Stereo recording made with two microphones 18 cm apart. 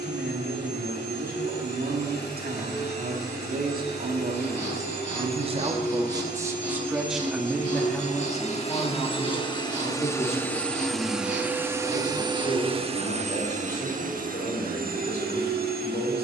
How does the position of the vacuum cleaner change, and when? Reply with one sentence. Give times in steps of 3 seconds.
You can hear the vacuum cleaner on the left from 0 s, in the centre from 9 s and on the right from 12 s.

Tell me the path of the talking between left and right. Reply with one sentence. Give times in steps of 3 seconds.
You can hear the talking on the right from 0 s, in the centre from 6 s and on the left from 9 s.